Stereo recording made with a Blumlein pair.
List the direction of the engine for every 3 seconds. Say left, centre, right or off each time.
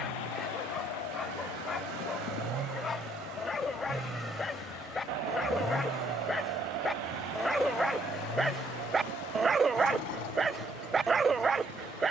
right, centre, left, left.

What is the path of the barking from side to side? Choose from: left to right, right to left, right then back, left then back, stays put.
left to right.